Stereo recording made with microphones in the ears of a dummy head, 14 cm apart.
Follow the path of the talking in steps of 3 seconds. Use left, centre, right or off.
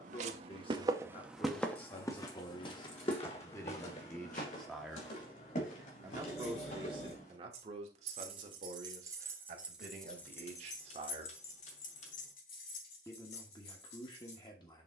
left, centre, right, right, left.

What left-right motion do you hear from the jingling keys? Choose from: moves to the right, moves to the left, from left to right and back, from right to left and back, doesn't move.
moves to the left.